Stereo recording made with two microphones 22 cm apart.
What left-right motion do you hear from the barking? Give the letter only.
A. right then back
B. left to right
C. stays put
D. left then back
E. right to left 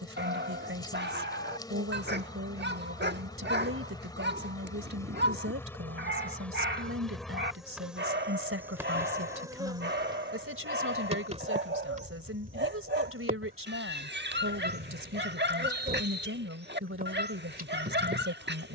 C.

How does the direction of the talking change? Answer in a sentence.
You can hear the talking stay put.